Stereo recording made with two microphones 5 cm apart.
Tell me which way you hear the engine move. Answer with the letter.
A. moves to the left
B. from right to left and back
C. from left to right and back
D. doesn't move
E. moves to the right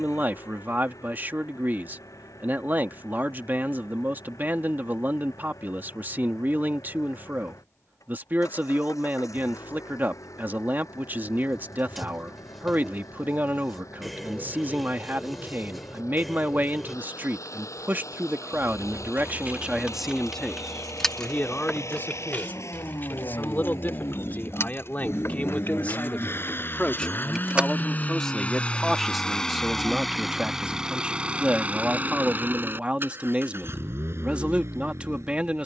E.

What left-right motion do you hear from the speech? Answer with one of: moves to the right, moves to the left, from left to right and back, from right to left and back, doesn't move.
from right to left and back.